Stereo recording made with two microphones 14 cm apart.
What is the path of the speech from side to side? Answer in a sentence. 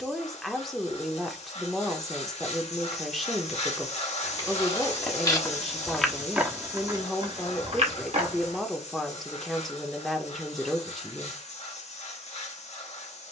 In this clip you hear the speech stay put.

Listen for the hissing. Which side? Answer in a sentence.
You can hear the hissing on the left.